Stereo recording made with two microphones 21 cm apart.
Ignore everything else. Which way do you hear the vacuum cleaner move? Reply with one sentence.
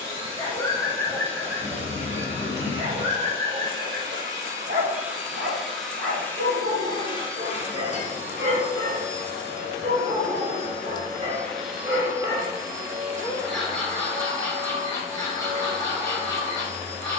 You can hear the vacuum cleaner go left and come back.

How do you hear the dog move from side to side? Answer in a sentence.
In this clip you hear the dog move from left to right and back again.